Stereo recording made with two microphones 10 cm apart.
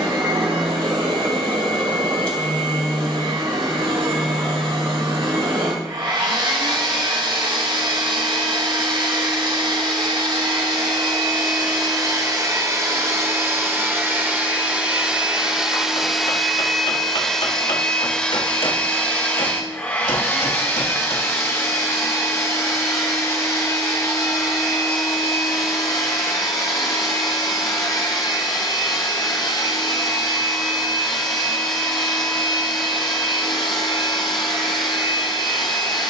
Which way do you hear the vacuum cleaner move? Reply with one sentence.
In this clip you hear the vacuum cleaner go from the right side to the left.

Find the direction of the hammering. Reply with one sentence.
You can hear the hammering on the left.